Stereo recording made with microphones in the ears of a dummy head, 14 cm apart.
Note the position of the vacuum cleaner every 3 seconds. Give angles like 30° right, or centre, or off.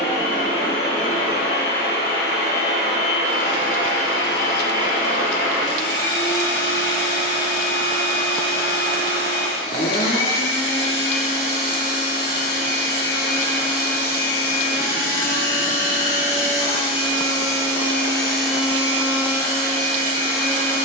70° left, 70° left, 70° left, 70° left, 70° left, 40° left, 20° right.